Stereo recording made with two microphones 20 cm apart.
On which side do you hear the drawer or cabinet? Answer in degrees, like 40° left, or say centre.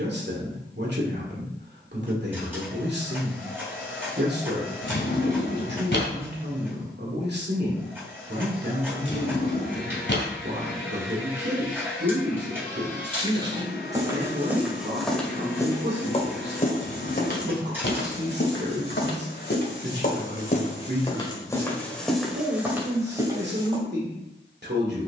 60° left.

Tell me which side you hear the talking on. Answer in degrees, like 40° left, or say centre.
60° right.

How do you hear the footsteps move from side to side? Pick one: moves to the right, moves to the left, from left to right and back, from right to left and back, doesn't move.
from right to left and back.